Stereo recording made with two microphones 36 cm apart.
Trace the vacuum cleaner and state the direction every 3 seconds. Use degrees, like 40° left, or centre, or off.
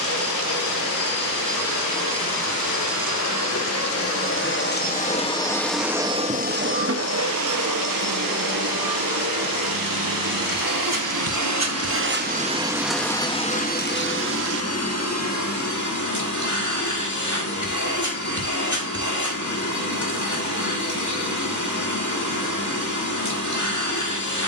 60° left, 30° left, 50° right, 60° right, 10° left, 50° left, 50° left, 50° left.